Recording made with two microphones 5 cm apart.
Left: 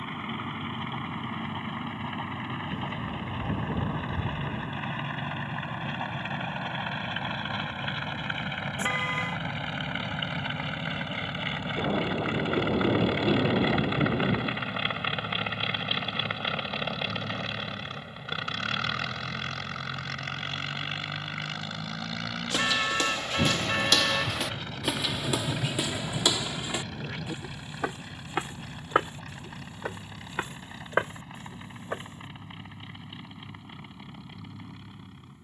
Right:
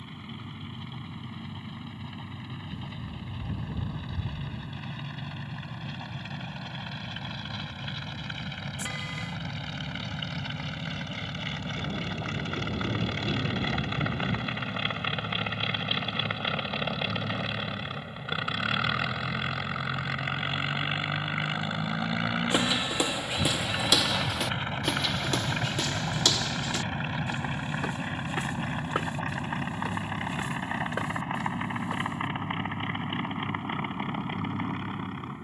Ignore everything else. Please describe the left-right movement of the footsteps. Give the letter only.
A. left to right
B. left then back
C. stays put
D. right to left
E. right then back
D.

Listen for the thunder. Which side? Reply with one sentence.
In this clip you hear the thunder on the left.